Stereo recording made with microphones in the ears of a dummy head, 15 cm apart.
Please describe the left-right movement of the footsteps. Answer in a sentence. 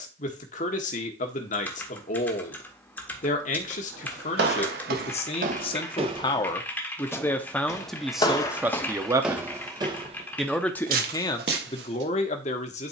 In this clip you hear the footsteps go left and come back.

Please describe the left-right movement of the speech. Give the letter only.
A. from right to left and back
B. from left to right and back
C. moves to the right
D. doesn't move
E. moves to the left
B.